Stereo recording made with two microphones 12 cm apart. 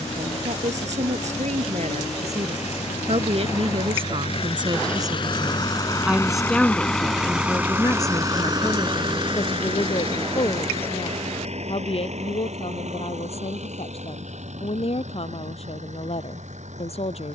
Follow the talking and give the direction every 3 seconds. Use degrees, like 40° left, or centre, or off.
70° right, 50° right, 20° left, 50° left, 60° left, 60° left.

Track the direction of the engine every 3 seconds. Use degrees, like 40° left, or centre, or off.
70° left, 50° left, 10° right, 60° right, 70° right, 70° right.